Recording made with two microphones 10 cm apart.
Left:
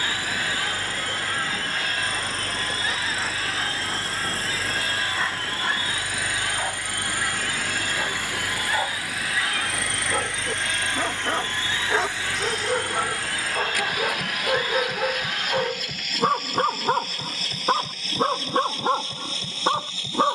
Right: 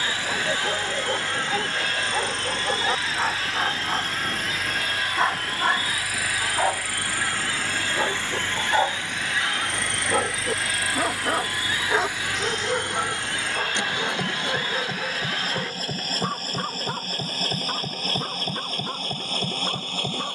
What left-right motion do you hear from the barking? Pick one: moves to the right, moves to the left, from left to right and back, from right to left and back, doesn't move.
moves to the left.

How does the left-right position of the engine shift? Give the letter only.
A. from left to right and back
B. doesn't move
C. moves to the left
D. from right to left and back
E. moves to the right
E.